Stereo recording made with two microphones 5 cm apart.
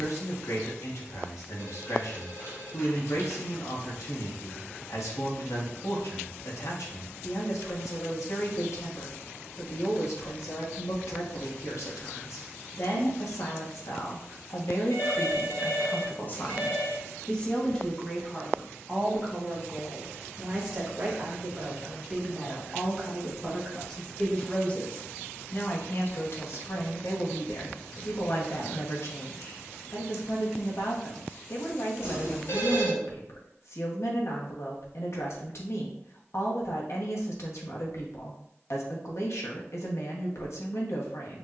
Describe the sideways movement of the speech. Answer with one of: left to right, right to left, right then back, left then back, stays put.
right then back.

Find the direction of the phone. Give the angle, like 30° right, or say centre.
60° left.